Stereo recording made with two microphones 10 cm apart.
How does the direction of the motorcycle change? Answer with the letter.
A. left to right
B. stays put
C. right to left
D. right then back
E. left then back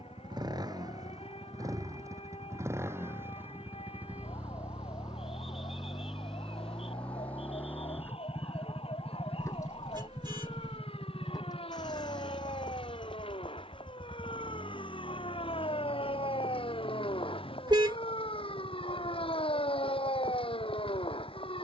C.